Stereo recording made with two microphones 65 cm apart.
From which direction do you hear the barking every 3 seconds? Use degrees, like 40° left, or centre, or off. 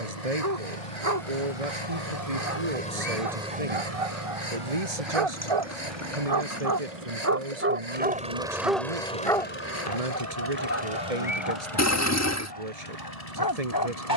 70° right, 60° right, 20° right, 20° left, 30° left.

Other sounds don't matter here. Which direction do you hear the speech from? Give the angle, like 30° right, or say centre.
70° right.